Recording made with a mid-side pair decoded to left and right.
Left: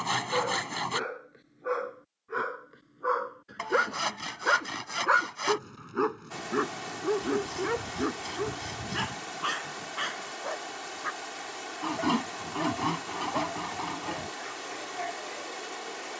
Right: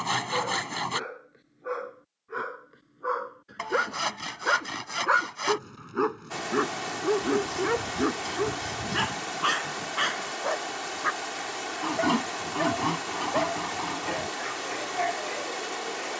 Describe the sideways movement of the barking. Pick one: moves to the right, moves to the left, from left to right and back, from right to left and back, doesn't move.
moves to the right.